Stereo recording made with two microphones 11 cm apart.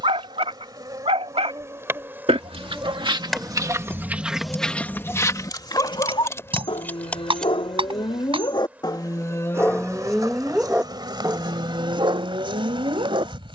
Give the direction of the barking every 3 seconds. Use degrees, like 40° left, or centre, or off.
60° right, centre, 50° left, centre, 50° right.